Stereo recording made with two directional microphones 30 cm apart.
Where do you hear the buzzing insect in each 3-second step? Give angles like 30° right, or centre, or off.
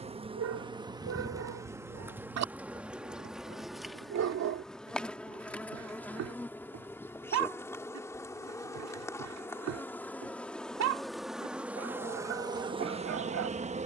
10° right, centre, 10° left, centre, 20° right.